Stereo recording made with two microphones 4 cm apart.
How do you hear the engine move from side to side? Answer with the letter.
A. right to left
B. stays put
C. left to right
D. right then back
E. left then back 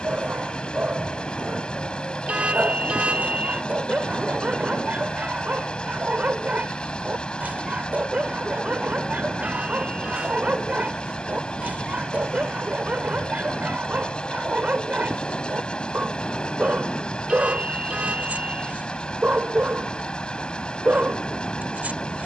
B.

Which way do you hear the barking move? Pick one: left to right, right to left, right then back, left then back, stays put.
stays put.